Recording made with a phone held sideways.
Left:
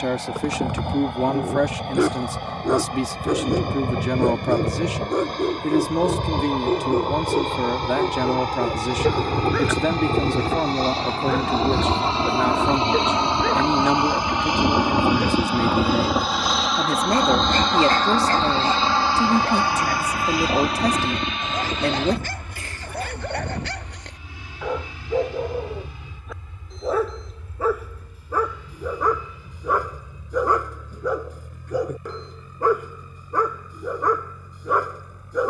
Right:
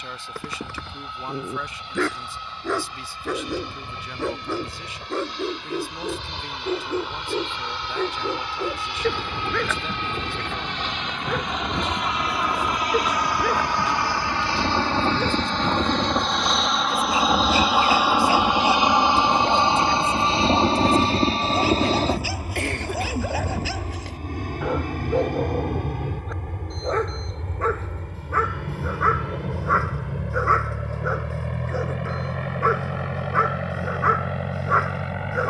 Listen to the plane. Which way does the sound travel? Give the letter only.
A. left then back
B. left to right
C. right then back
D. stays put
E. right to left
B.